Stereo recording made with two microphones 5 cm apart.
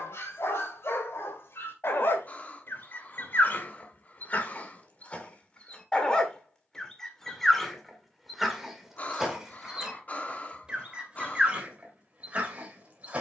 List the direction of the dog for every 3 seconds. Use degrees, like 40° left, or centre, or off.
60° left, 40° left, 10° left, 20° right, 30° right.